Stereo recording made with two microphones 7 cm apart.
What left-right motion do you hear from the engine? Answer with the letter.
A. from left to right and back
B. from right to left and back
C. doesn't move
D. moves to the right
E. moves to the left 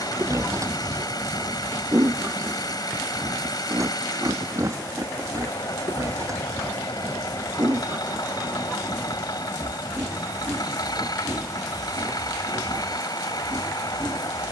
C.